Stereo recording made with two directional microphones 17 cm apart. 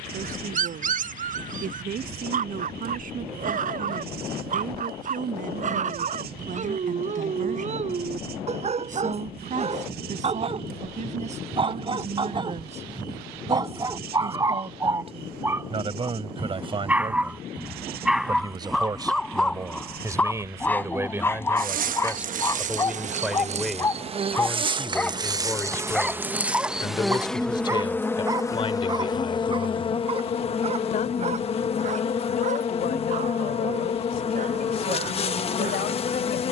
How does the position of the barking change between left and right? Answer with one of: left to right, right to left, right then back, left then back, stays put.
left then back.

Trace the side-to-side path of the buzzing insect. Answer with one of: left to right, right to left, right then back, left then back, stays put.
right to left.